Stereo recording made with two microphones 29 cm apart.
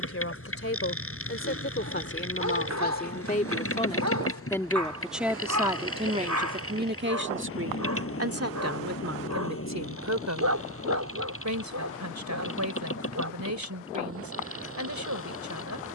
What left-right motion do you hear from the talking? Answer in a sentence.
In this clip you hear the talking move to the right.